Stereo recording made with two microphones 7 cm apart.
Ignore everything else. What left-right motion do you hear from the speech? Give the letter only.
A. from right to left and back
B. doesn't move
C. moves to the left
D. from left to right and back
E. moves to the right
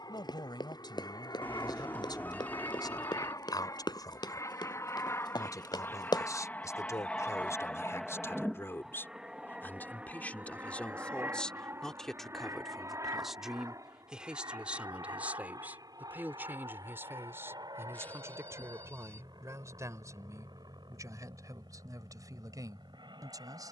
E.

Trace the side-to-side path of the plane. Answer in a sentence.
In this clip you hear the plane travel towards the right.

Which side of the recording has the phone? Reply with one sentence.
In this clip you hear the phone on the left.